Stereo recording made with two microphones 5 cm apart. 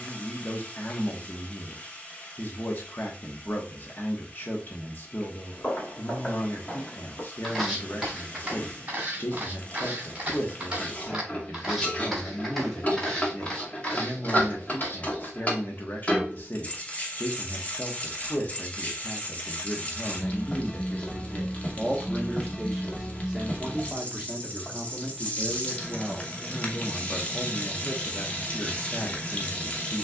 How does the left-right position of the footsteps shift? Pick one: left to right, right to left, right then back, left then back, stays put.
right then back.